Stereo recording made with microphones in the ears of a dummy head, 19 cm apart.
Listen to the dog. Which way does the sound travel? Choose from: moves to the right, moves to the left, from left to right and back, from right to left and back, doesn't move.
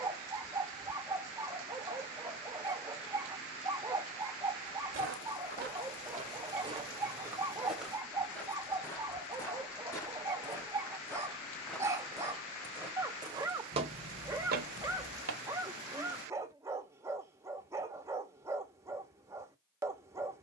doesn't move.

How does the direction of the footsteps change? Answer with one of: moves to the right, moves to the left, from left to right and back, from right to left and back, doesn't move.
from right to left and back.